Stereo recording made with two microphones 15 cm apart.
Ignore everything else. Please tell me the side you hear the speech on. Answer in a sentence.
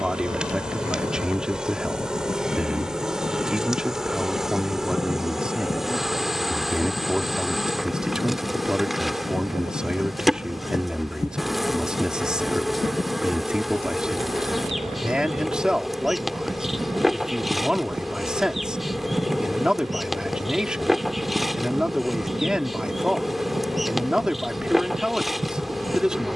In this clip you hear the speech in the centre.